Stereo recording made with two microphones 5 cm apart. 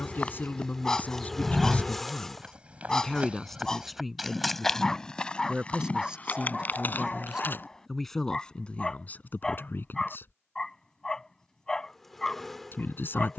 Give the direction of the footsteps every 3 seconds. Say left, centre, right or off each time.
centre, centre, left, off, off.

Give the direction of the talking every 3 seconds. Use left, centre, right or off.
left, centre, centre, left, left.